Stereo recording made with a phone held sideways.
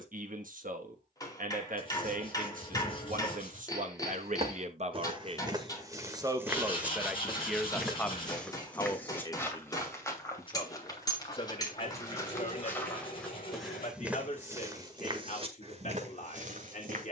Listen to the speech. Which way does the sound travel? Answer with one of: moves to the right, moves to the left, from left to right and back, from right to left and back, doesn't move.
moves to the left.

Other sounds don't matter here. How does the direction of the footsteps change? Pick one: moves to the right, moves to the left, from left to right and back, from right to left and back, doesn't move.
from right to left and back.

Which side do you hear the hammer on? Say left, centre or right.
left.